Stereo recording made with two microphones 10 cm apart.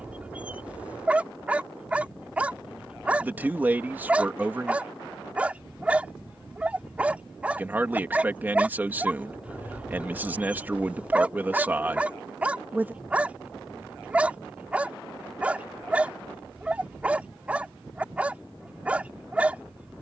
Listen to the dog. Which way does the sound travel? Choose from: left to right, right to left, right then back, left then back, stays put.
stays put.